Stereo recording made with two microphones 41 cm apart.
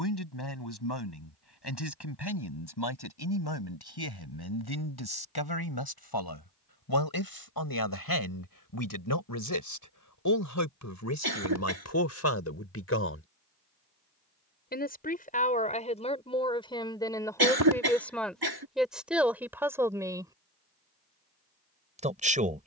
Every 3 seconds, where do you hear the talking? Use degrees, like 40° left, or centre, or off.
70° left, 60° left, 60° left, 40° left, 30° left, 10° left, centre, 20° right.